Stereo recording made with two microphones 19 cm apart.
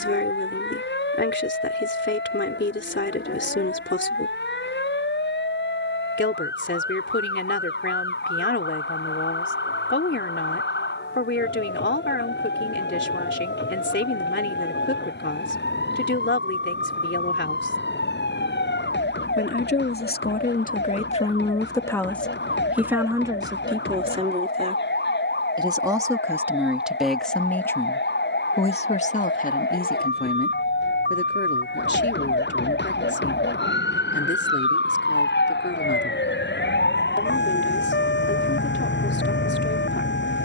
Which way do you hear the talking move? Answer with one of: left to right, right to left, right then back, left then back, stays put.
right then back.